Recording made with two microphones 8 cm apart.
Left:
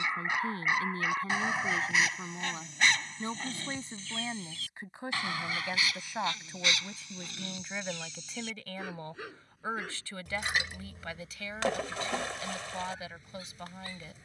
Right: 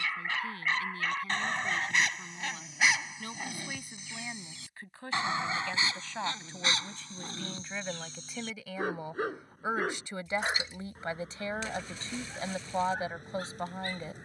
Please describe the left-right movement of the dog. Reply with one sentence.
In this clip you hear the dog move to the right.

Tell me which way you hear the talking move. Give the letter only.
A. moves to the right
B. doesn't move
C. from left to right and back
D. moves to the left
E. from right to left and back
A.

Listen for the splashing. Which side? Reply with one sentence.
In this clip you hear the splashing on the left.